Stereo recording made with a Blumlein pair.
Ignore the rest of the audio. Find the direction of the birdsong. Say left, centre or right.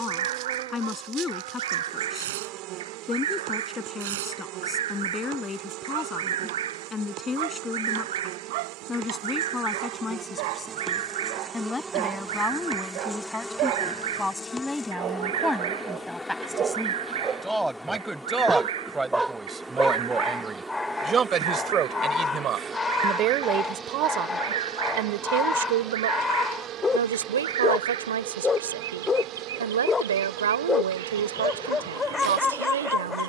right.